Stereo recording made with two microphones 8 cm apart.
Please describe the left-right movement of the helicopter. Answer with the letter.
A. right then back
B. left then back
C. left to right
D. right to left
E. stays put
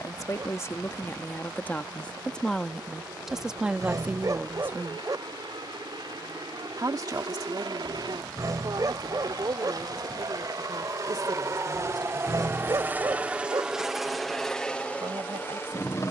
D.